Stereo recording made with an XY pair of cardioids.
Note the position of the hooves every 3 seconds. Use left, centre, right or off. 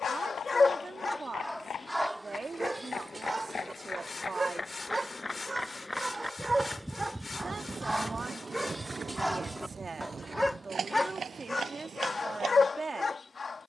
left, left, centre, right, right.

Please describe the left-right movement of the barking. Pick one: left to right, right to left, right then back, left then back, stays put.
right then back.